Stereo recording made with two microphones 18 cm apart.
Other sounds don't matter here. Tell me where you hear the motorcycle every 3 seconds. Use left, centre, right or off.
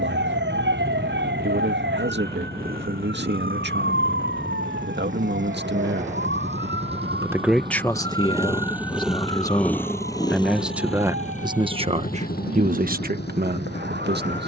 right, right, right, left, left.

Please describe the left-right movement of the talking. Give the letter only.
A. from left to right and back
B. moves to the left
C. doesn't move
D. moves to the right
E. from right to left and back
E.